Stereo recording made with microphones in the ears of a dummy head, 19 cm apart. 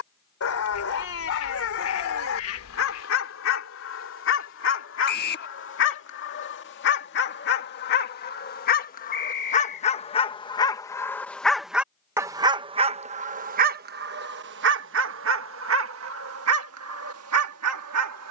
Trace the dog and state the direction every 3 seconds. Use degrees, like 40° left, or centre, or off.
60° left, 60° left, 50° left, 20° left, 40° right, 70° right.